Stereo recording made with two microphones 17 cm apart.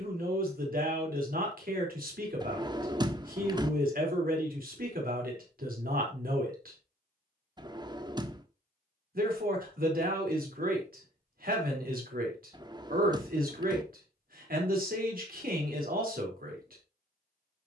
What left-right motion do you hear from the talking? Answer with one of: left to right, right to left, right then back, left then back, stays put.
stays put.